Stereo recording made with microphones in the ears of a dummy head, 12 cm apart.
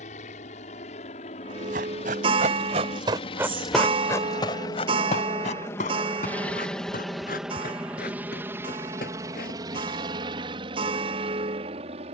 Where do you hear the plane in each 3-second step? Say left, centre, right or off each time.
left, left, centre, right.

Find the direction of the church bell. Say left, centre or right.
right.